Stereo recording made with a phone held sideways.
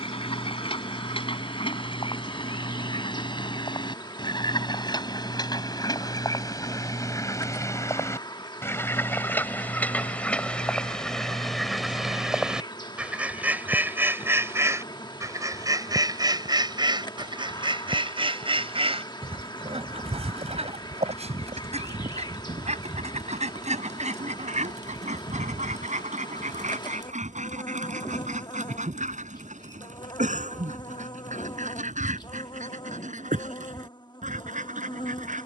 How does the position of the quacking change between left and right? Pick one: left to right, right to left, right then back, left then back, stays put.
left to right.